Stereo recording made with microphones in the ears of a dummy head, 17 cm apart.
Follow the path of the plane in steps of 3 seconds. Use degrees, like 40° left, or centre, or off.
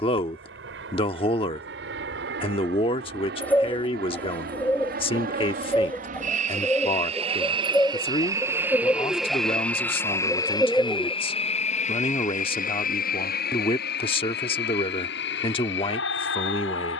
70° right, 60° right, 30° right, 20° left, 50° left, 60° left.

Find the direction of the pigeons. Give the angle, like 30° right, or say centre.
10° left.